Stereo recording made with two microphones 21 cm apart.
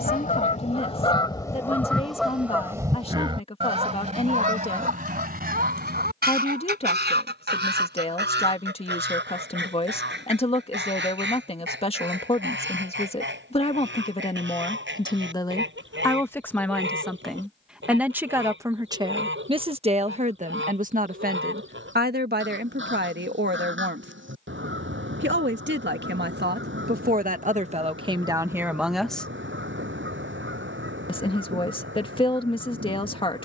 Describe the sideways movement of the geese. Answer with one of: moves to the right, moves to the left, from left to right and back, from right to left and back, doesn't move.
moves to the right.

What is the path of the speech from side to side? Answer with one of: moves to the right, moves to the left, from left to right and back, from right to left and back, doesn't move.
from left to right and back.